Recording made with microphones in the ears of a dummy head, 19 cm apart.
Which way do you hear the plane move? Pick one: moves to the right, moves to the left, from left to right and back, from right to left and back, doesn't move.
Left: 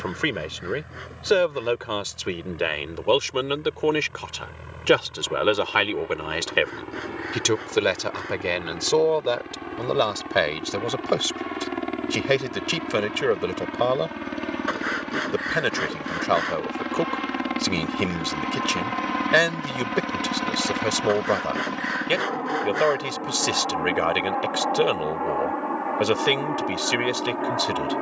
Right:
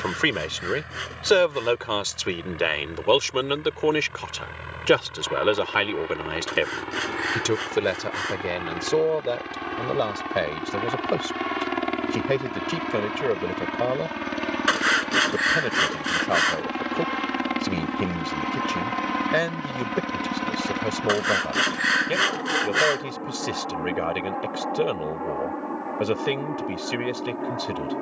moves to the left.